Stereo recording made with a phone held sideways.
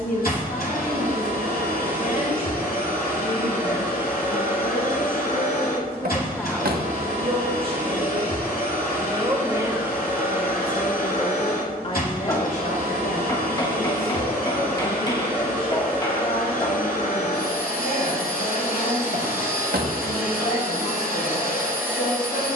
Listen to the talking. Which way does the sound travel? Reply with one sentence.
In this clip you hear the talking go right and come back.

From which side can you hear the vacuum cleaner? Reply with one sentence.
You can hear the vacuum cleaner on the left.